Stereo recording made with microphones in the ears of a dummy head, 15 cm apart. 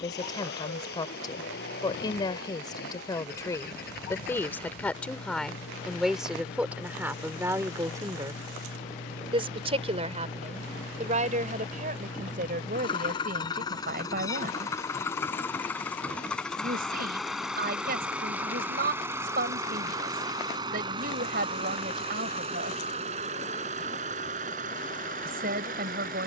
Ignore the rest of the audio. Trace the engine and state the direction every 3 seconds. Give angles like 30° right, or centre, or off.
60° left, 60° left, 50° left, 40° left, 20° left, centre, 20° right, 30° right, 50° right.